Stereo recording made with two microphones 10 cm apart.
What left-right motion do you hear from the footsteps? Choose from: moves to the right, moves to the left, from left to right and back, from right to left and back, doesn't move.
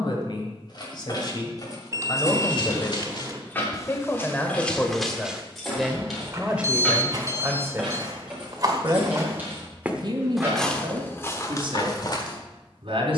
from left to right and back.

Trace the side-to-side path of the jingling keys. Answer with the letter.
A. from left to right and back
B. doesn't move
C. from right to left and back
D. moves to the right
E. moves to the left
D.